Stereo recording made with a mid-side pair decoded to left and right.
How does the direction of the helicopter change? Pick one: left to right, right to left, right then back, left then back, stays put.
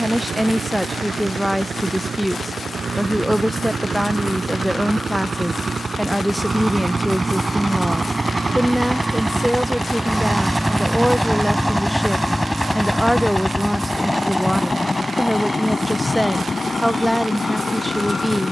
right to left.